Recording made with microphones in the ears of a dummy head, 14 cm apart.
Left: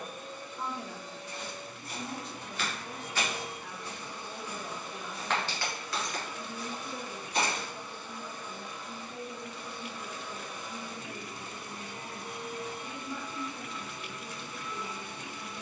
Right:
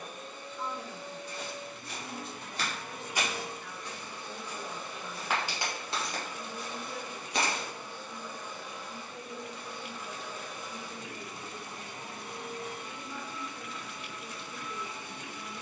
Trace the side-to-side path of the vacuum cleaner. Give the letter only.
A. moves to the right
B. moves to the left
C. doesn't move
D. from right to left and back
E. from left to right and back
E.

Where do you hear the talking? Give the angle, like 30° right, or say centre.
10° left.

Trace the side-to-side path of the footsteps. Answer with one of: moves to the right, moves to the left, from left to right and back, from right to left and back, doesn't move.
from right to left and back.